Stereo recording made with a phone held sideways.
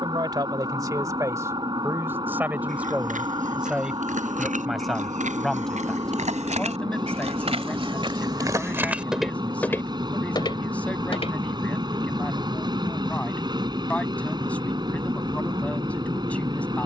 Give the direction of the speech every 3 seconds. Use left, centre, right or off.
right, centre, centre, centre, centre, centre.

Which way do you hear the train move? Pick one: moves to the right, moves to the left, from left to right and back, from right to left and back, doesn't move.
doesn't move.